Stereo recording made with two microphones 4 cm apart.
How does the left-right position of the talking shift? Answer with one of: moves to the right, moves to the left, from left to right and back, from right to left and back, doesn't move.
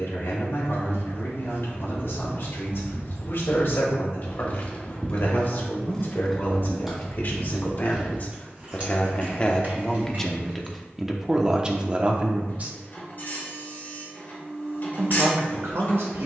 moves to the right.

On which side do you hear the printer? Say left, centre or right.
left.